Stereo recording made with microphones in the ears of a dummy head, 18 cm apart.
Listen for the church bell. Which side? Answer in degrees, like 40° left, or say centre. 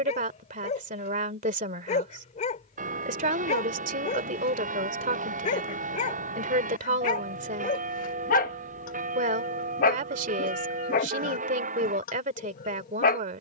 40° right.